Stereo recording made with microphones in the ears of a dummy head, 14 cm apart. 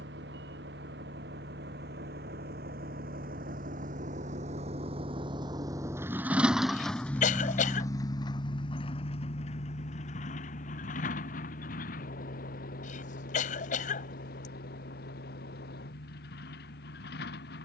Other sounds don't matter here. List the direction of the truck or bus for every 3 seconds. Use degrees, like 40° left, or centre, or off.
70° right, 40° right, 10° left, 50° left, 60° left, 60° left.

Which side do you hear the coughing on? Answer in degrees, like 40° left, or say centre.
50° left.